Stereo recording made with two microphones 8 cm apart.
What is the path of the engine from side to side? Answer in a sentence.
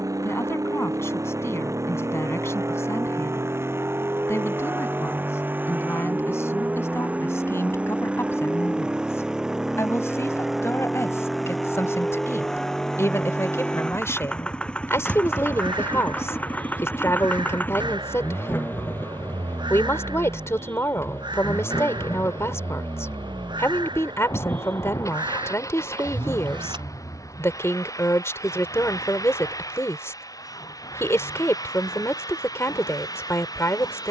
In this clip you hear the engine go from the right side to the left.